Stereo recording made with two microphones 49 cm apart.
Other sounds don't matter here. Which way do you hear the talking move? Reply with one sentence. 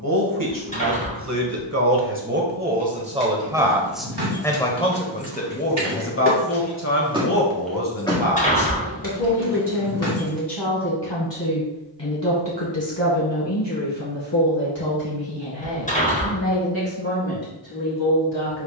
In this clip you hear the talking move from right to left.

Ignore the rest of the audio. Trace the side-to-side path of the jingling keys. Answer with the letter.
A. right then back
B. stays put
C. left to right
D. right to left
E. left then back
D.